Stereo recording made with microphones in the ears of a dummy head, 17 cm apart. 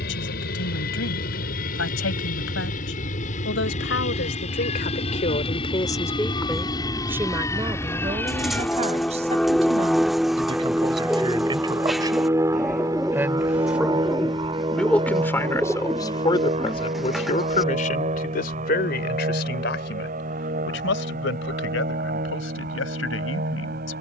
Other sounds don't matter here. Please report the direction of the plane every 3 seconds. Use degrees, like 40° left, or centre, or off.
50° left, 40° left, 20° left, centre, 20° right, 30° right, 40° right, 50° right.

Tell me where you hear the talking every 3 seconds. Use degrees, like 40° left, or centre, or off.
80° left, 50° left, 20° right, 30° right, 10° right, 30° left, 60° left, 80° left.